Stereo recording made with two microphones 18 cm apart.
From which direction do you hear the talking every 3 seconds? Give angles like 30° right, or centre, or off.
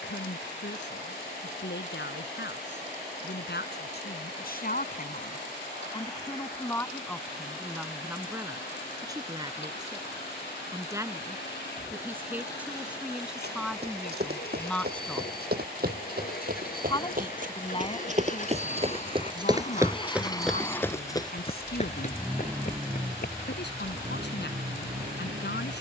80° left, 60° left, centre, 20° right, centre, 20° left, 50° left, 60° left, 70° left.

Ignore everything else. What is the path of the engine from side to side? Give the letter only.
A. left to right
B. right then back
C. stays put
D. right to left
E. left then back
A.